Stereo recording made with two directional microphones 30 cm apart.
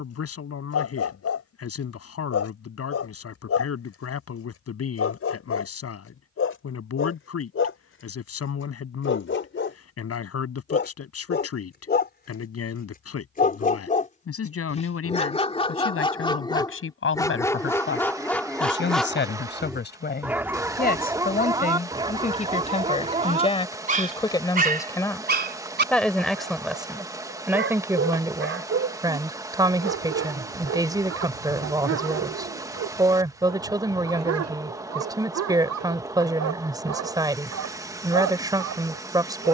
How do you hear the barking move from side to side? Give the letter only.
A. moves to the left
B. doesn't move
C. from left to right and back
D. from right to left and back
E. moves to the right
E.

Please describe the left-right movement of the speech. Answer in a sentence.
You can hear the speech travel towards the right.